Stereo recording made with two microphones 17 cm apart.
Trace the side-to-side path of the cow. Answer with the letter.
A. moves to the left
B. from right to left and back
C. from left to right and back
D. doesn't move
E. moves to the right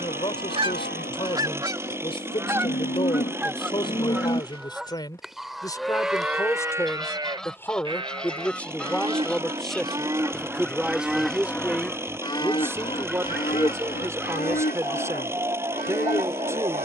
C.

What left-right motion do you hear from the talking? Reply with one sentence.
In this clip you hear the talking travel towards the right.